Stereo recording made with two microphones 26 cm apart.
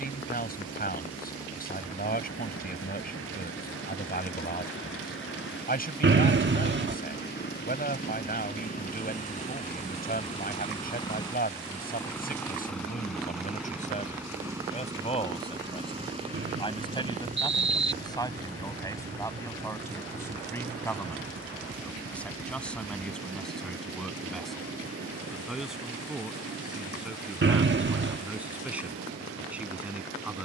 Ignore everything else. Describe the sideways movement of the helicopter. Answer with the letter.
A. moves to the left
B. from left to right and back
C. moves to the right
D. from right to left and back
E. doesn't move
C.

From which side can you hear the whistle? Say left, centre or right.
right.